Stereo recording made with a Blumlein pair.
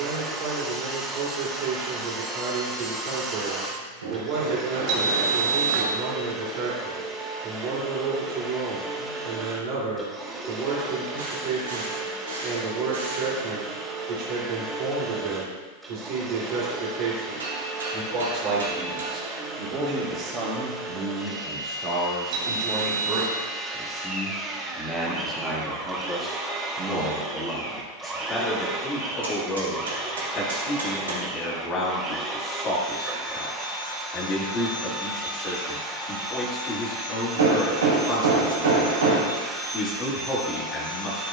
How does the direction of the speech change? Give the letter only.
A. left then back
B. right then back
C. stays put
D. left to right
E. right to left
E.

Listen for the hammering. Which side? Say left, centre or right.
right.